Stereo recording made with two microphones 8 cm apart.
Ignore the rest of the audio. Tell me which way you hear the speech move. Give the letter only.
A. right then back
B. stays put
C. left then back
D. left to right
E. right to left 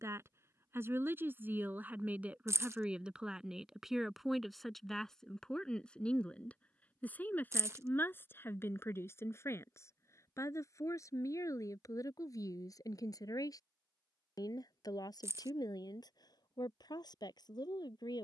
E.